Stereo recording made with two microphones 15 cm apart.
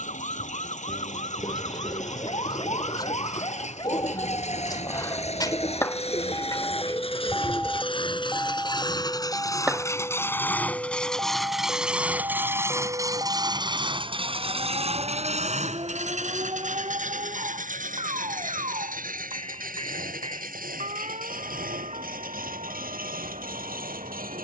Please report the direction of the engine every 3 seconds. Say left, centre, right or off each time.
left, left, left, centre, right, right, right, right.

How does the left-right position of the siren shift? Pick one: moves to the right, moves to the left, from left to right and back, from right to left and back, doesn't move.
moves to the right.